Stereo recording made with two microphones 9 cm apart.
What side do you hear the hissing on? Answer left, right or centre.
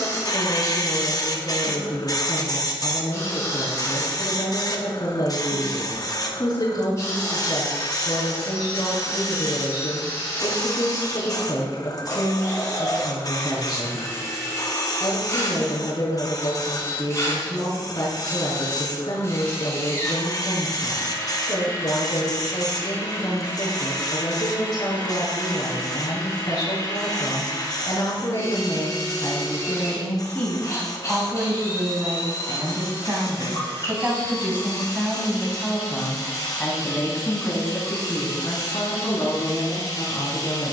left.